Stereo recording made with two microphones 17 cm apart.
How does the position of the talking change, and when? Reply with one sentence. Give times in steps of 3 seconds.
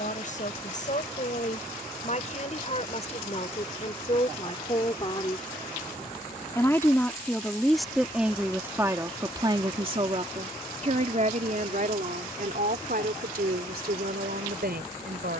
You can hear the talking on the left from 0 s, in the centre from 6 s and on the right from 9 s.